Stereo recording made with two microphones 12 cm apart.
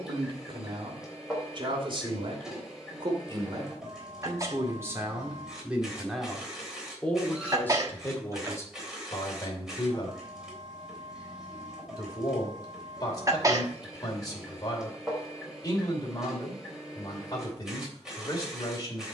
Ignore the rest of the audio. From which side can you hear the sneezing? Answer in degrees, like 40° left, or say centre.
30° right.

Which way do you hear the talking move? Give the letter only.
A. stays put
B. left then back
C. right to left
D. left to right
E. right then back
C.